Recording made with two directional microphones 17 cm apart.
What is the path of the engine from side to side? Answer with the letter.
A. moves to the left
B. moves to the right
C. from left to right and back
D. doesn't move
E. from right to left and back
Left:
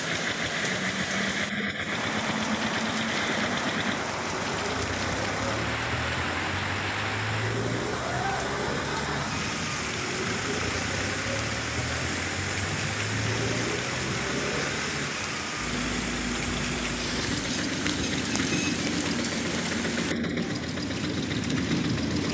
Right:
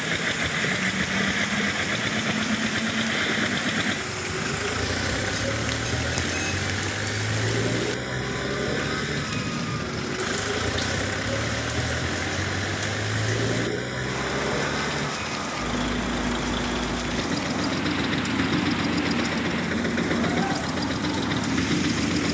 D.